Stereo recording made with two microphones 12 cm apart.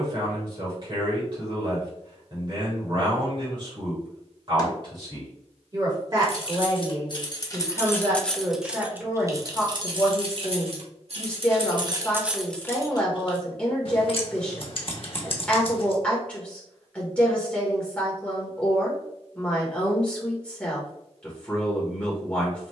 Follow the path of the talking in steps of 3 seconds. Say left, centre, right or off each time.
right, right, right, centre, centre, centre, centre, centre.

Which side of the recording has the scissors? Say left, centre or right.
left.